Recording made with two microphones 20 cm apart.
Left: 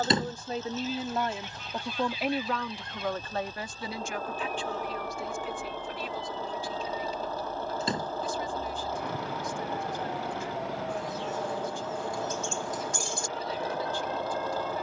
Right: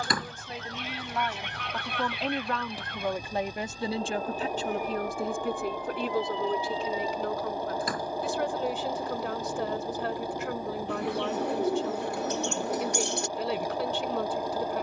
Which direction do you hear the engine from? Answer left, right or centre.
centre.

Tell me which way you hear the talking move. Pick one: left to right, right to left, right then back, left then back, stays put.
left to right.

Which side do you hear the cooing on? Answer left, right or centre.
right.